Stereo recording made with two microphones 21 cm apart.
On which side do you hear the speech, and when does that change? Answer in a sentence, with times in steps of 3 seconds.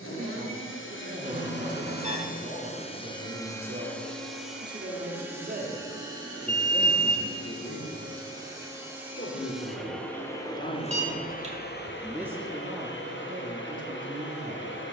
You can hear the speech on the right from 0 s, on the left from 6 s and on the right from 12 s.